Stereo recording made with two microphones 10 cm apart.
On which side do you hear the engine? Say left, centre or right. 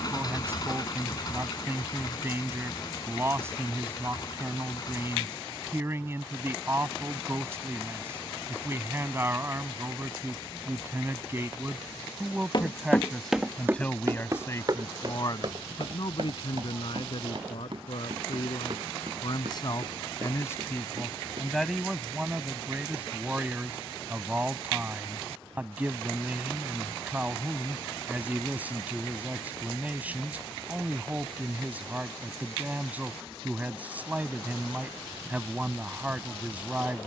left.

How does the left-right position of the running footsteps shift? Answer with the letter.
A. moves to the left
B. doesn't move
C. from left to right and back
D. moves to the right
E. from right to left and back
D.